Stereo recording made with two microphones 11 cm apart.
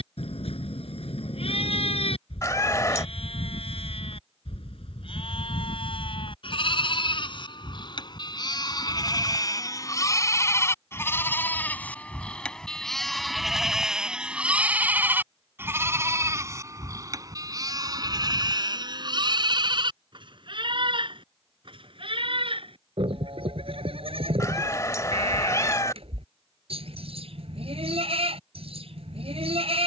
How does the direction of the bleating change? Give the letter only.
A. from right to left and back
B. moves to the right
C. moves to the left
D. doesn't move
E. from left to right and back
B.